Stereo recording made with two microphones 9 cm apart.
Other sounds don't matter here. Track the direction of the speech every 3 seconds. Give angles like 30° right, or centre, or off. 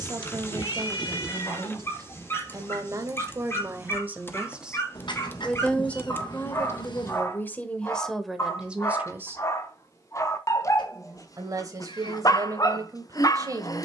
40° right, 10° right, 10° left, 30° right, 40° right.